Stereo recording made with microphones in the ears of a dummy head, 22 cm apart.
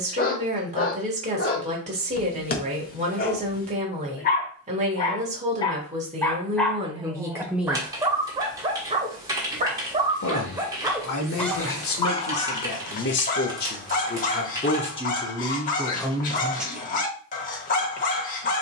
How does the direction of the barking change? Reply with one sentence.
You can hear the barking go right and come back.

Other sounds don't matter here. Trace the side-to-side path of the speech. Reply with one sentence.
You can hear the speech go left and come back.